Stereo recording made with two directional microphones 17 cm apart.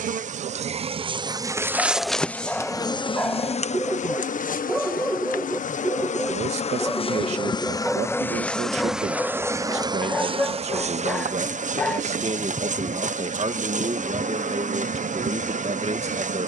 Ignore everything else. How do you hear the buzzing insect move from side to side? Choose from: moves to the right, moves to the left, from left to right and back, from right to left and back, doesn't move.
from right to left and back.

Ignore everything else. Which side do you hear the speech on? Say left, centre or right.
right.